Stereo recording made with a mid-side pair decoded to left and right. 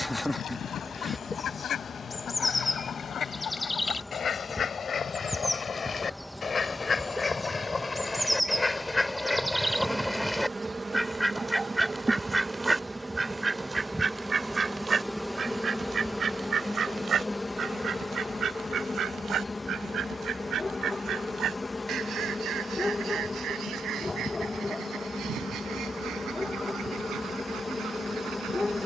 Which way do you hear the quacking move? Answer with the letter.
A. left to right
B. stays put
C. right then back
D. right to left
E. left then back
A.